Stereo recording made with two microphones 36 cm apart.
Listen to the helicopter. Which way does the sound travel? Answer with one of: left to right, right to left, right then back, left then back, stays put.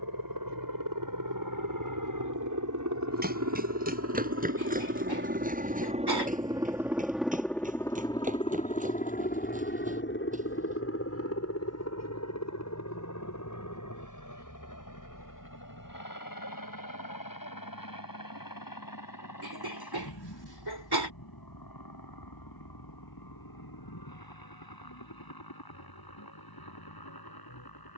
right to left.